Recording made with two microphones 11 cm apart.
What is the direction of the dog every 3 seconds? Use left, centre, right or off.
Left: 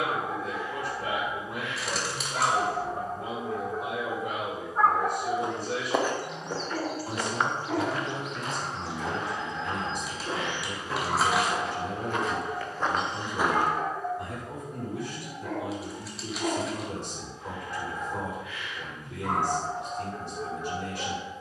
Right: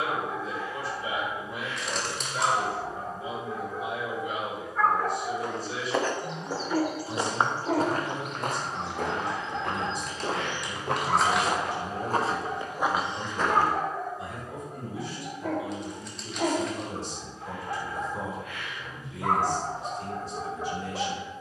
left, left, right, right, right, right, right.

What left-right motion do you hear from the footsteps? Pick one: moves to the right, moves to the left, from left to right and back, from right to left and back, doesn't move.
from left to right and back.